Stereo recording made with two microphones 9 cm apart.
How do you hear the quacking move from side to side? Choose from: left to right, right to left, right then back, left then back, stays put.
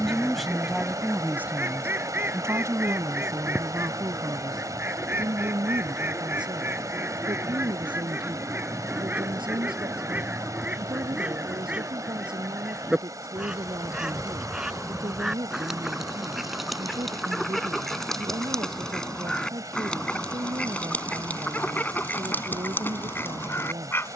right to left.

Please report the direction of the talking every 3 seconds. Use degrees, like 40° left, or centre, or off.
20° right, 50° right, 60° right, 70° right, 70° right, 70° right, 70° right, 70° right.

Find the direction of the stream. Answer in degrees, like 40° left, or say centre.
40° right.